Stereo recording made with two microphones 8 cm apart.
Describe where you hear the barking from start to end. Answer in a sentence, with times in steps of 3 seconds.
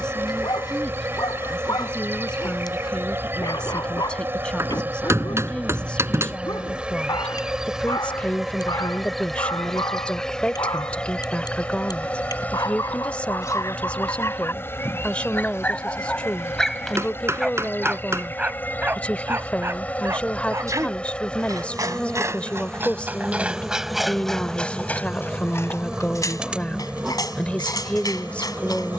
In this clip you hear the barking on the left from 0 s, in the centre from 15 s, on the right from 18 s and on the left from 24 s.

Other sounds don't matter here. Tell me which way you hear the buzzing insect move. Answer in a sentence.
In this clip you hear the buzzing insect move from right to left and back again.